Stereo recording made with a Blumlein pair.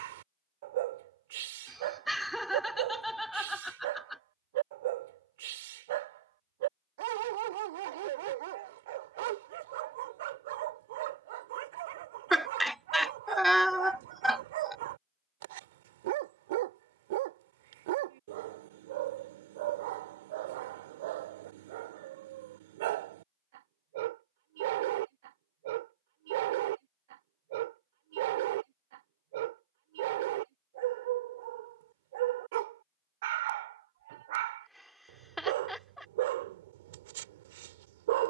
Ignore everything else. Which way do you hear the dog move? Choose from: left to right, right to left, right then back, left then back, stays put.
stays put.